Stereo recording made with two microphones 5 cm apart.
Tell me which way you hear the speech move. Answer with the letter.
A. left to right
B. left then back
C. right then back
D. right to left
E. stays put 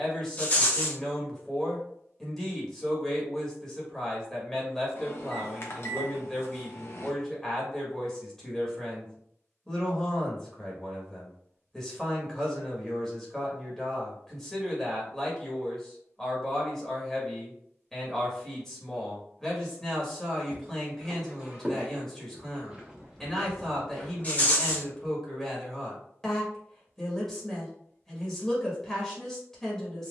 E.